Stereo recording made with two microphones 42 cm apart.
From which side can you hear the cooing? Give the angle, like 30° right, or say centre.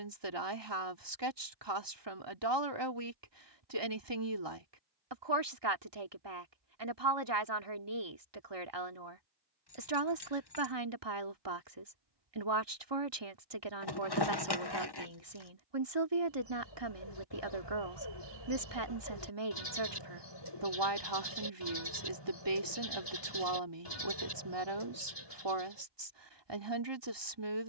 70° left.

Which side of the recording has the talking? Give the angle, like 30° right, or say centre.
80° right.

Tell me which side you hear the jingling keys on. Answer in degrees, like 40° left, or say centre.
70° left.